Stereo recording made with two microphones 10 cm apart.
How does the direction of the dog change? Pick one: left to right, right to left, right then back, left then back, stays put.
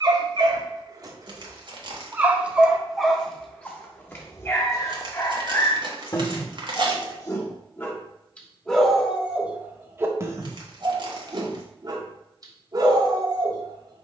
left then back.